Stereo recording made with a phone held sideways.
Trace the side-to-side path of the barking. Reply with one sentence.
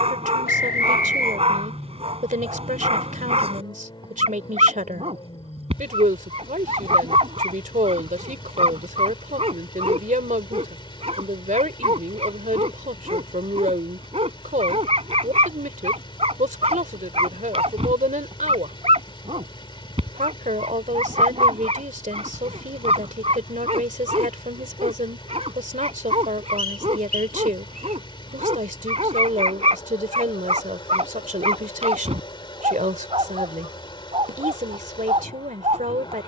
In this clip you hear the barking stay put.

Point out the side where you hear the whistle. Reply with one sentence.
You can hear the whistle on the left.